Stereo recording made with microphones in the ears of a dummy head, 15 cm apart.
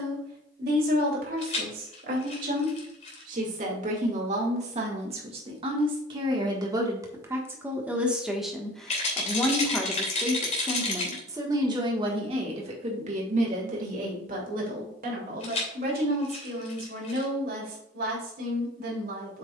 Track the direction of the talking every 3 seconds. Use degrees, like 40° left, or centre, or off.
60° right, 40° right, 10° right, 10° right, 40° right, 60° right, 60° right.